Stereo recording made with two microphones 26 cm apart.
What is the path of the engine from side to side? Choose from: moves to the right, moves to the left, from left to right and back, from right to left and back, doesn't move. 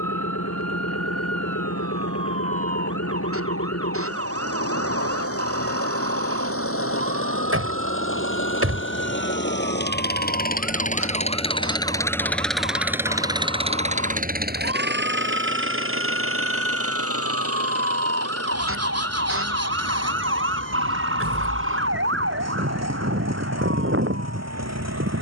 moves to the right.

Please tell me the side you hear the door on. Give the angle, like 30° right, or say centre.
60° right.